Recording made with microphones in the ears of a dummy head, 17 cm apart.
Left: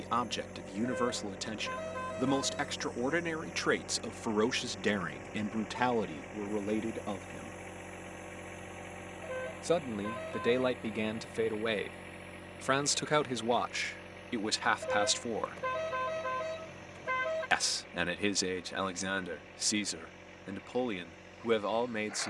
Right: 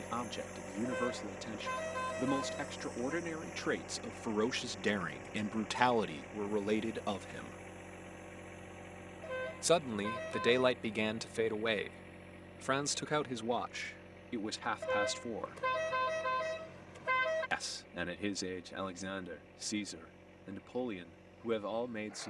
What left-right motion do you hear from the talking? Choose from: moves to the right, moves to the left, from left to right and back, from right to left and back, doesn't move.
from left to right and back.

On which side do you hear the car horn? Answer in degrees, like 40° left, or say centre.
20° right.